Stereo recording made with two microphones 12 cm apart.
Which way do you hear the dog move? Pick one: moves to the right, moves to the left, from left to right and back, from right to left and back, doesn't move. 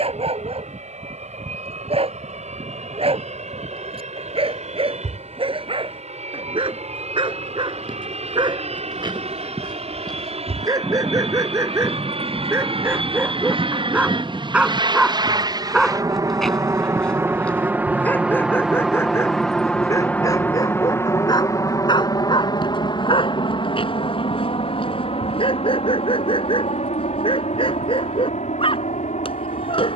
moves to the left.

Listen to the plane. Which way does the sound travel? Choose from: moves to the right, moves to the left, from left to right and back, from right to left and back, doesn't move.
moves to the left.